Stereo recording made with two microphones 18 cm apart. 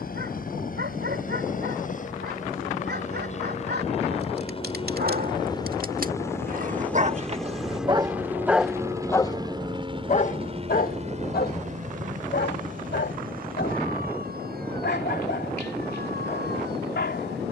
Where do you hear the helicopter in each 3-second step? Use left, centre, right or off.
left, left, centre, right, right, right.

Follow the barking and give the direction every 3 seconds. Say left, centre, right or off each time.
right, right, right, left, left, left.